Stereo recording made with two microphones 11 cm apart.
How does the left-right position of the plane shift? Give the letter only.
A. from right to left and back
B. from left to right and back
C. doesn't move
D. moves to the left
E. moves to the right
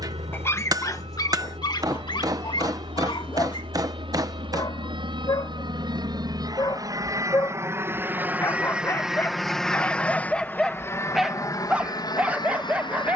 D.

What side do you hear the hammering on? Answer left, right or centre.
right.